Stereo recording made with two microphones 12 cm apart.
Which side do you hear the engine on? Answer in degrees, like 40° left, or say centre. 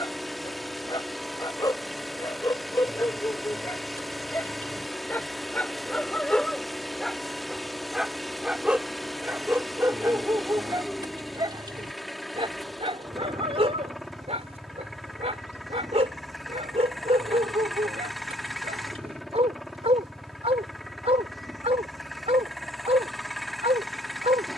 centre.